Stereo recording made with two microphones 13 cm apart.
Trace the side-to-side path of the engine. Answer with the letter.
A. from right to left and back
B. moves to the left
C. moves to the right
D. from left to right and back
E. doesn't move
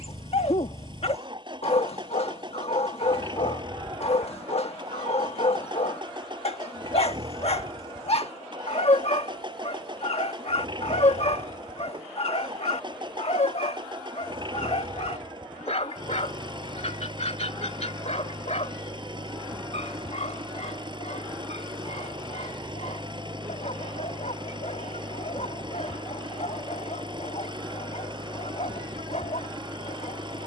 E.